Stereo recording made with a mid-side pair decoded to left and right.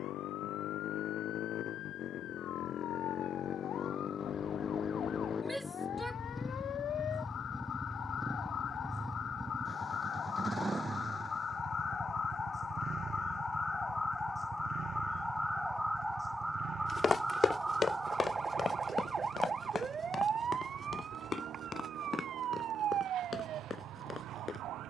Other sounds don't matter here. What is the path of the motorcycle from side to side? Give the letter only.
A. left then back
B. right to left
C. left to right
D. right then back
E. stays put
C.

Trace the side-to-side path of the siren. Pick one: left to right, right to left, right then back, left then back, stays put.
left to right.